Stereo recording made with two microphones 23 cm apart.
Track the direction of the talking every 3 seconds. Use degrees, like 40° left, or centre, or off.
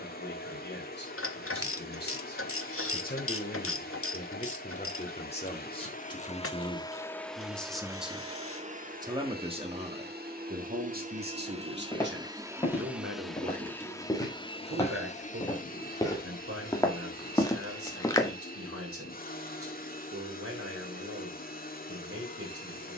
50° left, 30° left, 10° left, 40° right, 60° right, 70° right, 80° right, 80° right.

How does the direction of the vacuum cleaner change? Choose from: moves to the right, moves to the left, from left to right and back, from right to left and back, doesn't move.
from left to right and back.